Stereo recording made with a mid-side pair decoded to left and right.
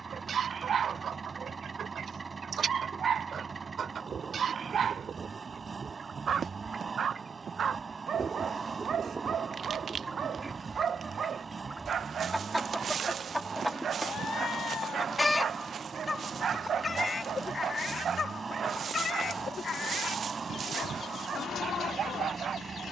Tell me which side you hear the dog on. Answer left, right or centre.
right.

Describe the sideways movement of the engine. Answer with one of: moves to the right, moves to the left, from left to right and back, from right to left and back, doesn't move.
doesn't move.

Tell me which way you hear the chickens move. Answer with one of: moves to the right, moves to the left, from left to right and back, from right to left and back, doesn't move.
moves to the left.